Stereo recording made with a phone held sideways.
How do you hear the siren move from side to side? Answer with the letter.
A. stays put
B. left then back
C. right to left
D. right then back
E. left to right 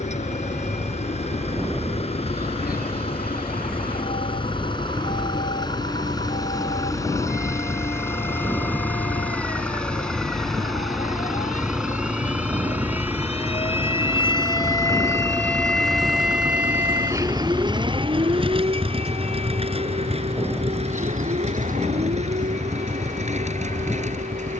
E.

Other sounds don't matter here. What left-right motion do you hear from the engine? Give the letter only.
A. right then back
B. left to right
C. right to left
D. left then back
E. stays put
B.